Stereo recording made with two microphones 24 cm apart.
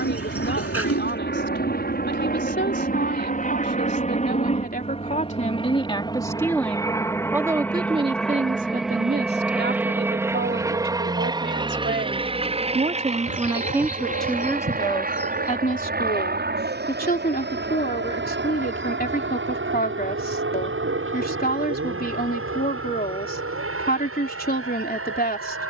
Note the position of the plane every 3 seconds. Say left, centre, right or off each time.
left, left, centre, centre, right, right, right, right, right.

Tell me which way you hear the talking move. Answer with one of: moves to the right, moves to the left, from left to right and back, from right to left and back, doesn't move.
from left to right and back.